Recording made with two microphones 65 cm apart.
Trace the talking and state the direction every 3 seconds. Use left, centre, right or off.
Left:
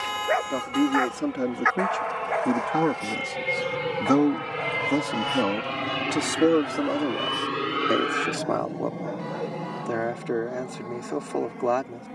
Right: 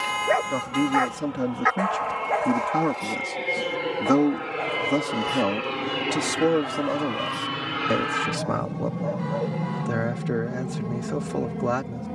right, centre, right, right.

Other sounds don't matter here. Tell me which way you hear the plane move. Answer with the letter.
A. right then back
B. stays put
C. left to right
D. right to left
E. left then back
C.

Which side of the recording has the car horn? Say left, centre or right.
centre.